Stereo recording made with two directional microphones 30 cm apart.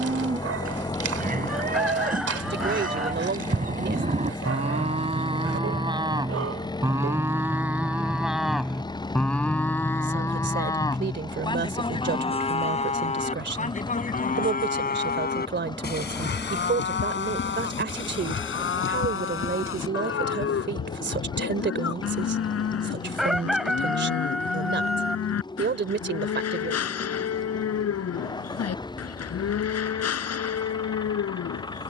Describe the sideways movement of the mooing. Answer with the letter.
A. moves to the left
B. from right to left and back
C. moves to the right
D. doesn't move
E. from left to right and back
A.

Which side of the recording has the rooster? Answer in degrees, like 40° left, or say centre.
centre.